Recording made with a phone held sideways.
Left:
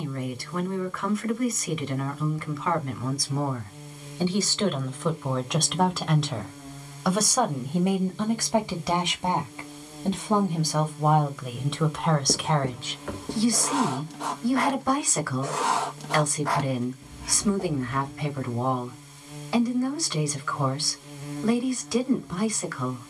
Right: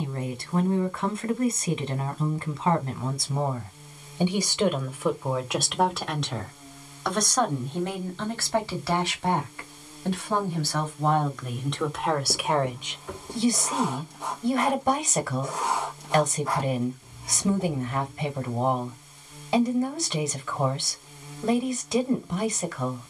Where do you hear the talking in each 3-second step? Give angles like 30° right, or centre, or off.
30° right, 10° right, 10° left, 10° left, 20° right, 20° right, 20° right, 20° right.